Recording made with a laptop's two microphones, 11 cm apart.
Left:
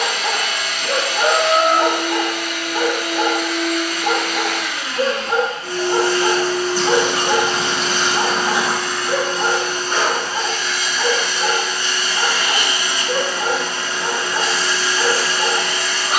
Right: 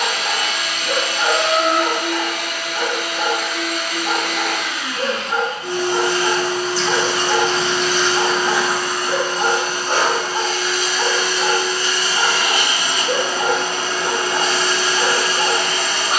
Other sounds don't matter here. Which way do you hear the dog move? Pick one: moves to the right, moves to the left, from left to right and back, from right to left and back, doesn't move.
moves to the right.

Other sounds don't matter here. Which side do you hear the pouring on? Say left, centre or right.
left.